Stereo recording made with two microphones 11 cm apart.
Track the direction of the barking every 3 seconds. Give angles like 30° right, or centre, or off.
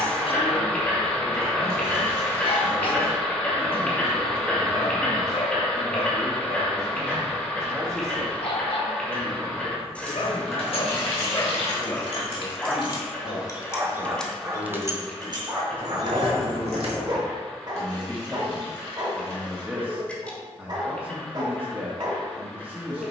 60° left, 60° left, 60° left, 50° left, 10° right, 40° right, 40° right, 40° right.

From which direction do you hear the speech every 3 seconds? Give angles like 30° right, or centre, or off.
30° right, 30° right, 30° right, centre, 50° left, 40° left, 10° right, 20° right.